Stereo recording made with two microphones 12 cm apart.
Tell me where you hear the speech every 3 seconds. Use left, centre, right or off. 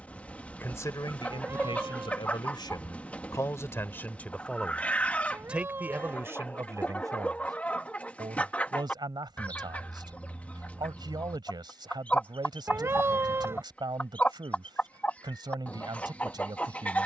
left, centre, right, right, right, right.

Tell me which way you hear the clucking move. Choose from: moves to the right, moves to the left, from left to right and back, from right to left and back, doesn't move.
doesn't move.